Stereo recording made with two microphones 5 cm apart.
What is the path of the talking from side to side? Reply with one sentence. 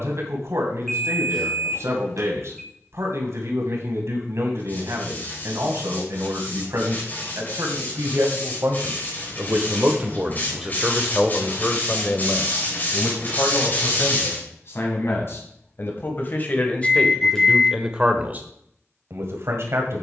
You can hear the talking move from right to left and back again.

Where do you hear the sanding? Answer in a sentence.
You can hear the sanding on the left.